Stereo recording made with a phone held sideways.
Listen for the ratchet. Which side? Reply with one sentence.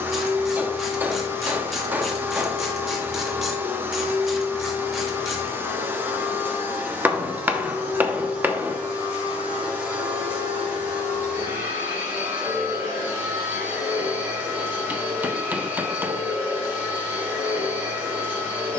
In this clip you hear the ratchet in the centre.